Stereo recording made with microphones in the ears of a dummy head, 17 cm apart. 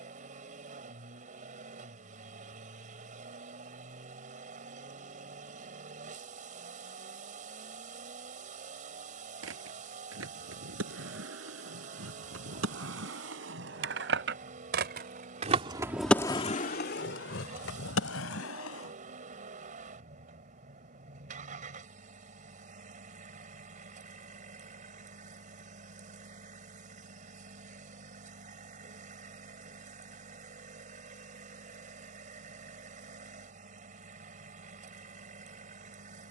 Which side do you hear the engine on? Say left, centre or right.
right.